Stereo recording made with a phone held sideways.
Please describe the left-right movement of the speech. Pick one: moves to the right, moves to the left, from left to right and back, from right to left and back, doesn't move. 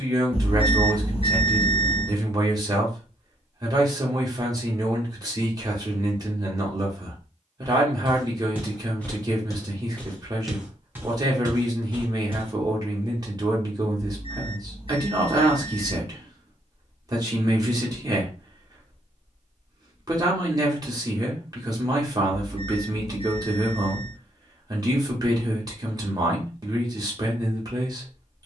doesn't move.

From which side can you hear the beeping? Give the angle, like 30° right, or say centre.
40° left.